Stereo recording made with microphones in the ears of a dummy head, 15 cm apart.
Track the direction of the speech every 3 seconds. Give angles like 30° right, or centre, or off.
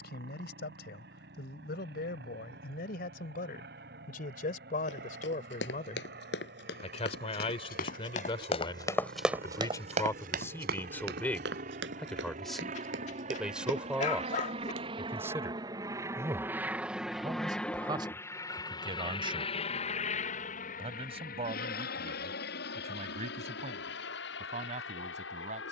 60° left, 50° left, 30° left, 10° left, centre, 20° right, 30° right, 40° right, 40° right.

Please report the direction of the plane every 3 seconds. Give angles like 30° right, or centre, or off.
70° right, 70° right, 60° right, 60° right, 40° right, 10° right, 30° left, 60° left, 70° left.